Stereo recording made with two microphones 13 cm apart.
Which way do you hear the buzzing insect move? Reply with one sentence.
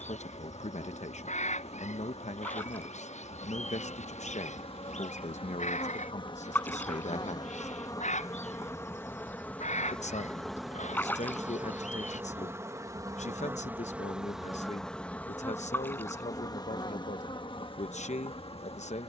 You can hear the buzzing insect move from left to right and back again.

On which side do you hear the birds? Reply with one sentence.
You can hear the birds on the left.